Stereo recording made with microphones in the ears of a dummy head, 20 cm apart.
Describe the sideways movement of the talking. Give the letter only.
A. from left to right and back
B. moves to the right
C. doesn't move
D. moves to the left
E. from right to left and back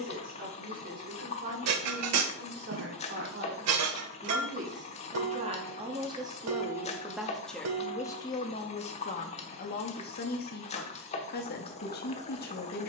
D.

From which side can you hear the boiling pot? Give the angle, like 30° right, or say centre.
30° left.